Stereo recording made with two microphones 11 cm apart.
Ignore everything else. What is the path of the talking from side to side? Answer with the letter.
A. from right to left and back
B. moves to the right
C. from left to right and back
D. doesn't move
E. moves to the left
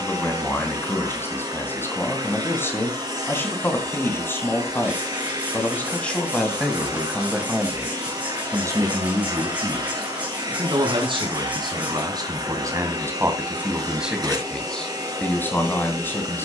C.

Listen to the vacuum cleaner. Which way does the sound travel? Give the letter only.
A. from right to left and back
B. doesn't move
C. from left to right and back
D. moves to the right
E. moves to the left
B.